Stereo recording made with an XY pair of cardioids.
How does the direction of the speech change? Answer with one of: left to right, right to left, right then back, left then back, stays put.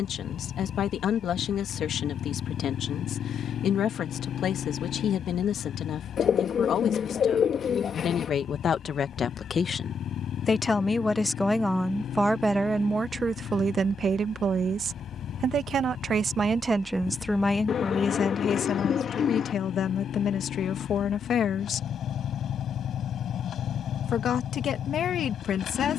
right then back.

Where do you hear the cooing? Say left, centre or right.
left.